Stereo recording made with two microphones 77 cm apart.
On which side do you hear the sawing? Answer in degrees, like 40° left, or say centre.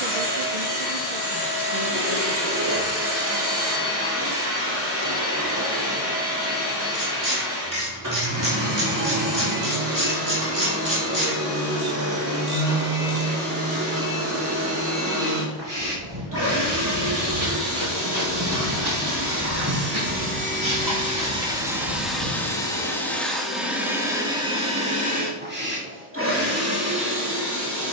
30° right.